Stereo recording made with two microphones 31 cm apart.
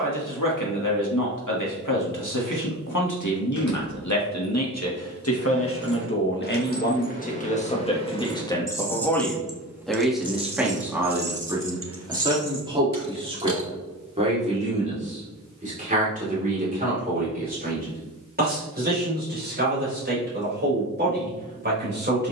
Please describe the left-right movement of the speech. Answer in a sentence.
In this clip you hear the speech move from left to right.